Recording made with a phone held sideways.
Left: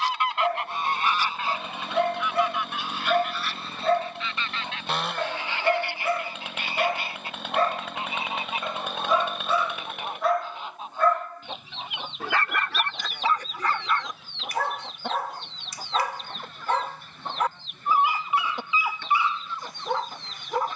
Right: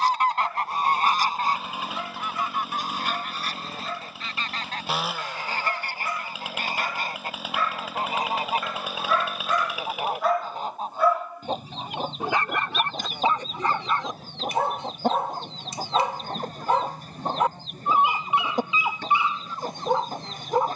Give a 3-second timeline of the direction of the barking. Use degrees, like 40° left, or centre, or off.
80° left, 80° left, 40° left, centre, 20° right, 20° right, 20° right.